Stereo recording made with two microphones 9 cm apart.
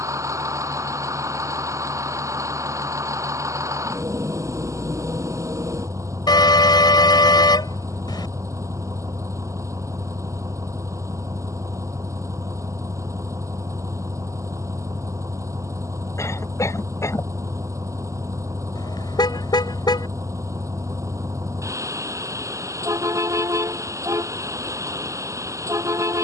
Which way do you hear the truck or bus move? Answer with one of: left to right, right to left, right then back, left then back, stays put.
stays put.